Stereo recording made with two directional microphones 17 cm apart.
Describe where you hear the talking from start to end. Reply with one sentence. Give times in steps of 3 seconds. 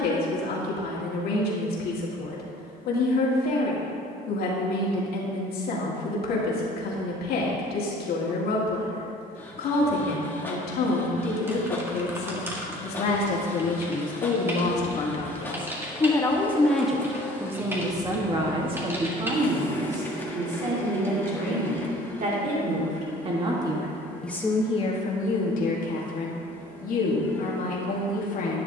You can hear the talking on the left from 0 s, in the centre from 15 s, on the right from 18 s and on the left from 24 s.